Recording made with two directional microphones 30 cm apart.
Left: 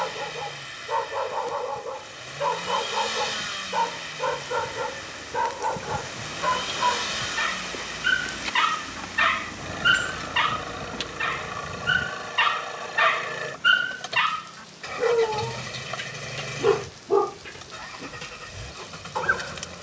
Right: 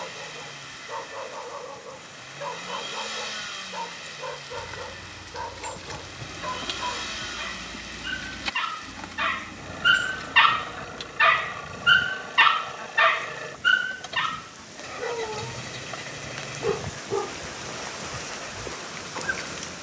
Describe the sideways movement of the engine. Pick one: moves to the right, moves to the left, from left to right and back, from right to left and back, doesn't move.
doesn't move.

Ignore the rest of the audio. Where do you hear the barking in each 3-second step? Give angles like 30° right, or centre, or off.
60° left, 60° left, 60° left, 20° right, centre, 50° left, 60° left.